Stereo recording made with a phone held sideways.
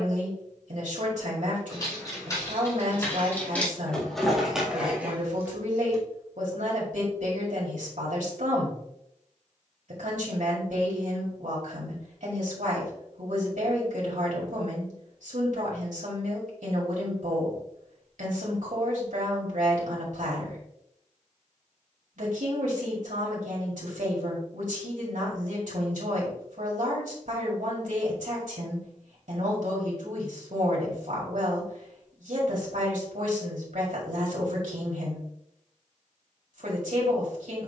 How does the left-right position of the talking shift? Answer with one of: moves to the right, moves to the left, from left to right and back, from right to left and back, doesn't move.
doesn't move.